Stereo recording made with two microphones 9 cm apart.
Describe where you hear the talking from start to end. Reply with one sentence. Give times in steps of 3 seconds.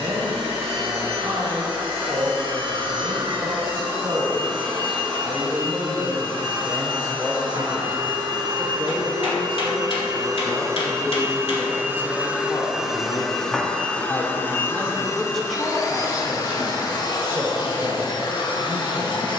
In this clip you hear the talking on the right from 0 s, in the centre from 9 s, on the left from 12 s, in the centre from 15 s and on the right from 18 s.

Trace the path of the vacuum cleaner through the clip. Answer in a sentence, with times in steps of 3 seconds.
You can hear the vacuum cleaner on the right from 0 s, in the centre from 12 s and on the left from 15 s.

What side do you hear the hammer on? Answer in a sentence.
In this clip you hear the hammer on the left.